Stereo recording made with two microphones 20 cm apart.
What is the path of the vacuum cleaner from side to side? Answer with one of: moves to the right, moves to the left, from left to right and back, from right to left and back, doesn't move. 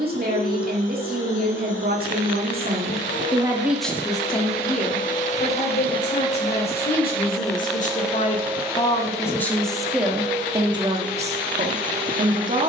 moves to the right.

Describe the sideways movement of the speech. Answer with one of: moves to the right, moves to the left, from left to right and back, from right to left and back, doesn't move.
from right to left and back.